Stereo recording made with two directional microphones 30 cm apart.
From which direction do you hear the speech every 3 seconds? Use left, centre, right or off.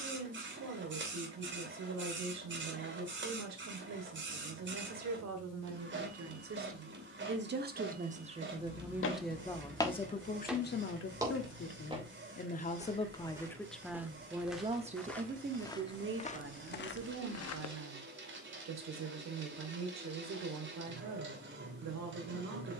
right, right, right, left, centre, right, right, right.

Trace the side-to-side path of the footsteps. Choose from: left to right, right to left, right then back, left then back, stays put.
right then back.